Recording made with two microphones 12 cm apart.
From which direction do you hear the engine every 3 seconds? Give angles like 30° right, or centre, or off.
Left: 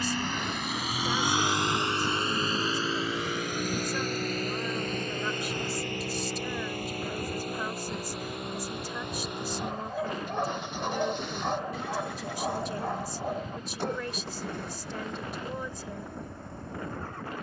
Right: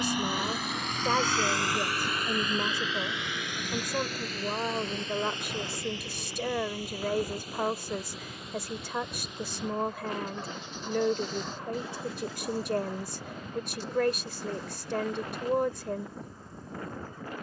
10° left, 50° left, 60° left, 60° left, 60° left, 60° left.